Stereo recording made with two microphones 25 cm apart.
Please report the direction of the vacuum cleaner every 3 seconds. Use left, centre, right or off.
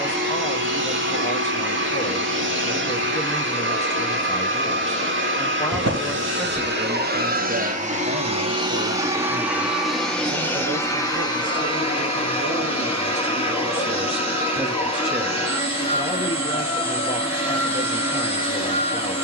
right, right, right, centre, left, left, left.